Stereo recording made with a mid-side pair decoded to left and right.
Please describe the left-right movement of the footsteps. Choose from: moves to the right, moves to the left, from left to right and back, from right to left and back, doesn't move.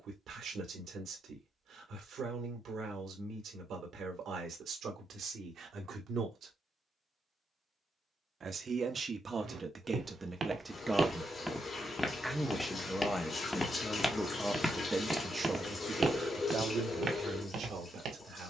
from right to left and back.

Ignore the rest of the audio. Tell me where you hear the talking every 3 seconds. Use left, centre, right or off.
right, right, right, right, centre, right.